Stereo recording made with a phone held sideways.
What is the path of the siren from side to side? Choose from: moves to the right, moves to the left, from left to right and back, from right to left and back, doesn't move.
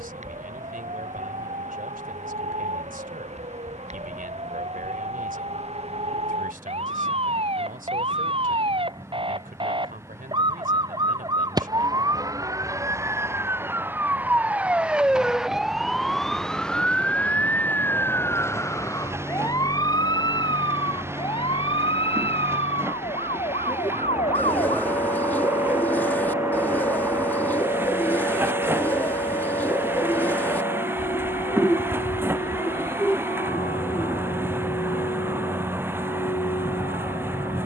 moves to the left.